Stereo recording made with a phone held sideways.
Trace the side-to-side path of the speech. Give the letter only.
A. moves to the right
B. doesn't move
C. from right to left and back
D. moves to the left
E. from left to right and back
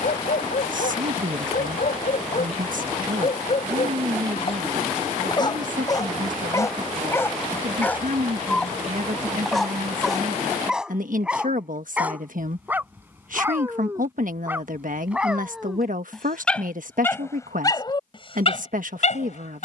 B.